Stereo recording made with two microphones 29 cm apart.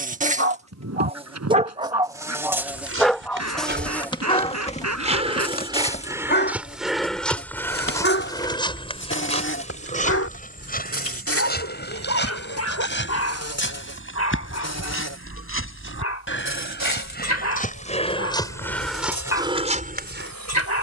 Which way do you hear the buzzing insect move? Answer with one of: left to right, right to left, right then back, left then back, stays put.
right to left.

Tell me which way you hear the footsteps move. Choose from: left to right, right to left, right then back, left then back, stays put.
left then back.